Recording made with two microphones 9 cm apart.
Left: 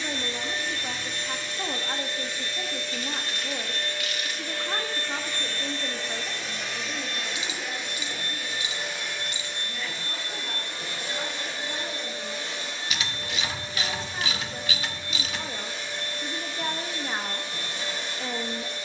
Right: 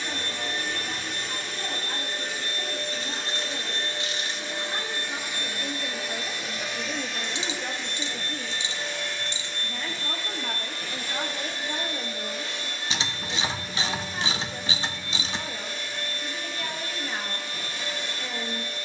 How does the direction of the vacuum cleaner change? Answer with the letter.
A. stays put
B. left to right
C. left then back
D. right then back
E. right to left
E.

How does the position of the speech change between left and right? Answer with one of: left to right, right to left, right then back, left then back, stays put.
right then back.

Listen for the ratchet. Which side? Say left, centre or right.
right.